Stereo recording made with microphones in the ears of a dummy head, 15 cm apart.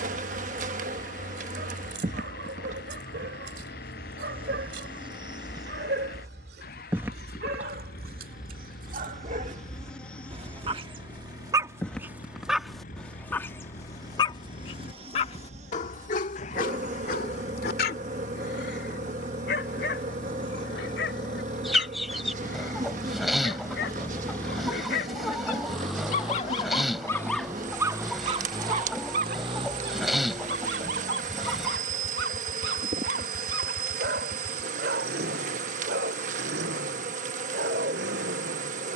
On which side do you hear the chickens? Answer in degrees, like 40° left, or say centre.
centre.